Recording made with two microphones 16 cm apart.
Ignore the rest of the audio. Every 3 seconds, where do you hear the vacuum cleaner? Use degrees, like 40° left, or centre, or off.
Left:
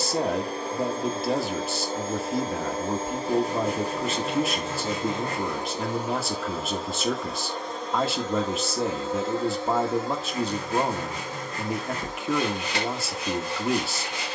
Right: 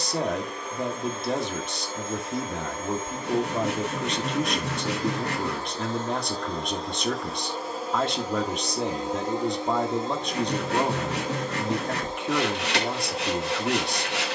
30° left, 30° left, centre, 20° right, 20° right.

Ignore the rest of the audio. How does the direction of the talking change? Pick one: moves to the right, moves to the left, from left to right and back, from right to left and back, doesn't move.
doesn't move.